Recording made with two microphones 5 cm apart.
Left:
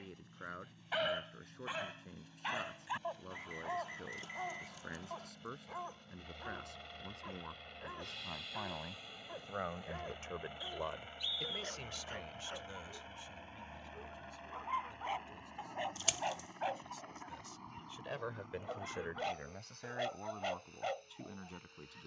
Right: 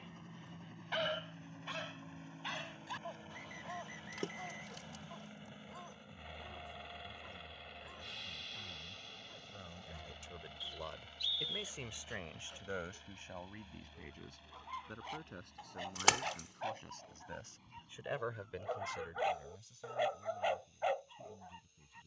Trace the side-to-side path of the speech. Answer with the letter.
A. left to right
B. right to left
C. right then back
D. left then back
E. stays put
C.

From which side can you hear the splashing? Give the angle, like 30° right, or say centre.
70° right.